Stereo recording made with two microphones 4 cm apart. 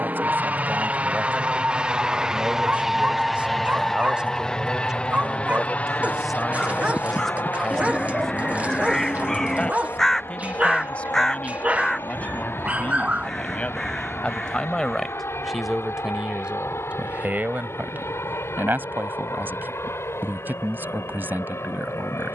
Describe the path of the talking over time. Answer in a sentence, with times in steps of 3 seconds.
You can hear the talking on the right from 0 s, in the centre from 6 s, on the left from 9 s and on the right from 15 s.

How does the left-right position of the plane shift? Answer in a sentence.
In this clip you hear the plane move to the left.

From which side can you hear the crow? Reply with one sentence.
You can hear the crow in the centre.